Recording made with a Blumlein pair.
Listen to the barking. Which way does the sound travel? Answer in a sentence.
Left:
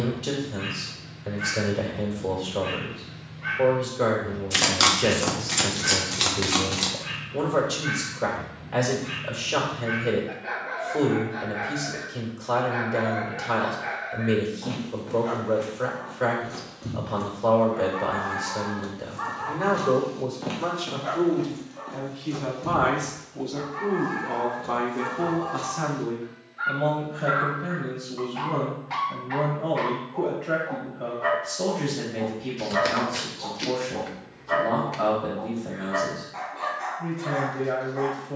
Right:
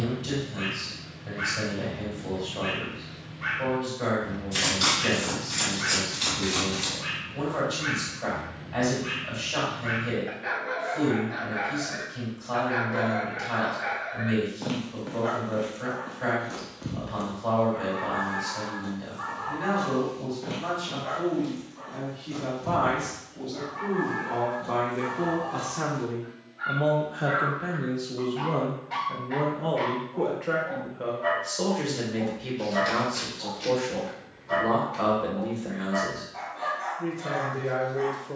In this clip you hear the barking travel towards the left.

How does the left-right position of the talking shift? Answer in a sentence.
In this clip you hear the talking go from the left side to the right.